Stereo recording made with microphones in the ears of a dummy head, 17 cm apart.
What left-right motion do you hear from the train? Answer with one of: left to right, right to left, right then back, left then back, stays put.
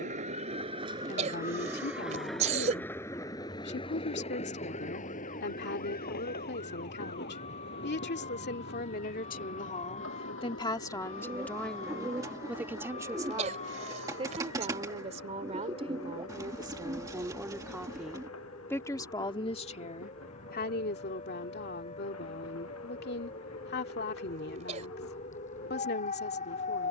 right to left.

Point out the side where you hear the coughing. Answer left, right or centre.
right.